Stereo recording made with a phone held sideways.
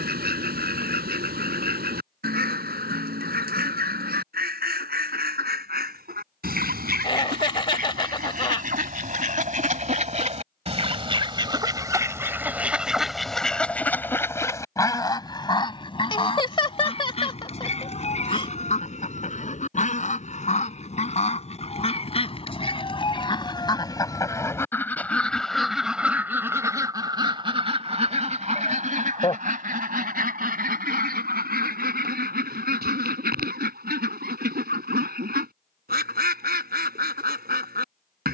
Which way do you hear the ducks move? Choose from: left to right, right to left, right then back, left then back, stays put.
left then back.